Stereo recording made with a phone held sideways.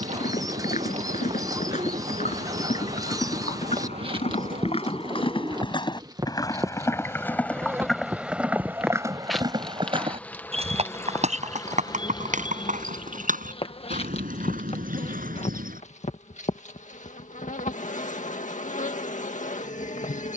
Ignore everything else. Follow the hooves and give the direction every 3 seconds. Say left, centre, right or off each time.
left, left, centre, right, right, right, off.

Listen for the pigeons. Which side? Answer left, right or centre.
right.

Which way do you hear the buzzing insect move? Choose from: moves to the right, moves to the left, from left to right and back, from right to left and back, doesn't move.
moves to the left.